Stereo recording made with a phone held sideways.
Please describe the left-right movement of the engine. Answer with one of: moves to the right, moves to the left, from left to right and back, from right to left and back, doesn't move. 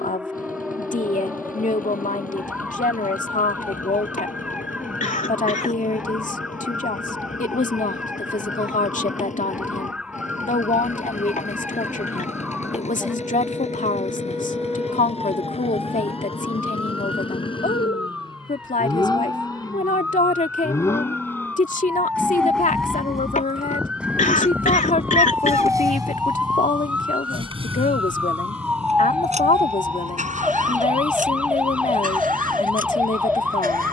moves to the right.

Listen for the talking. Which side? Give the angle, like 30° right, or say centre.
50° left.